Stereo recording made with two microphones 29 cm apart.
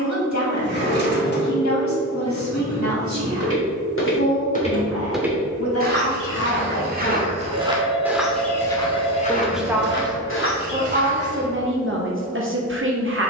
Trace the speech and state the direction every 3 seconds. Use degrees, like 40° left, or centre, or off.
70° left, 60° left, 50° left, 20° right, 40° right.